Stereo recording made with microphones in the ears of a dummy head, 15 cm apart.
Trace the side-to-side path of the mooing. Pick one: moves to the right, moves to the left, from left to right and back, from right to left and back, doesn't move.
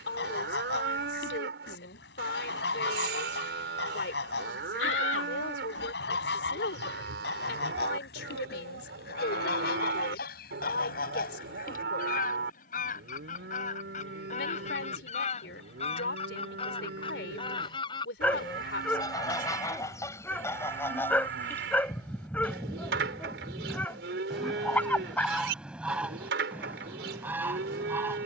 doesn't move.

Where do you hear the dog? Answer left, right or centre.
centre.